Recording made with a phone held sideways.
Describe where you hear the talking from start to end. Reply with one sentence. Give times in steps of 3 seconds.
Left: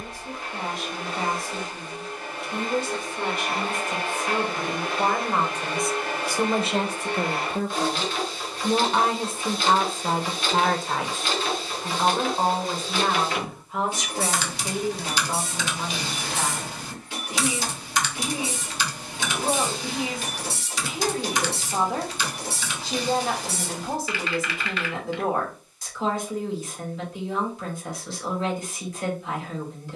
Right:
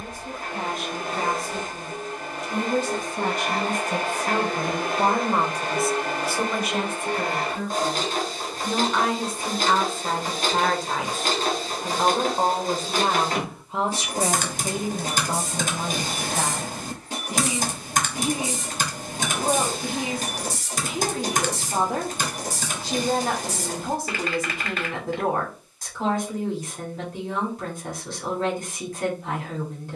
In this clip you hear the talking on the right from 0 s, on the left from 6 s, in the centre from 9 s and on the right from 12 s.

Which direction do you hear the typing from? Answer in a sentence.
In this clip you hear the typing on the right.